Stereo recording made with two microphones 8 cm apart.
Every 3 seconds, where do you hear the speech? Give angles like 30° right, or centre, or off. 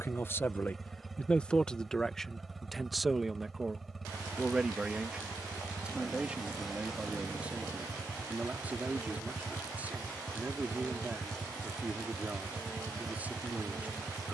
10° left, 10° right, 20° right, 20° right, 20° right.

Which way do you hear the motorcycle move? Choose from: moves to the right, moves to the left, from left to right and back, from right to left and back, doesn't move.
doesn't move.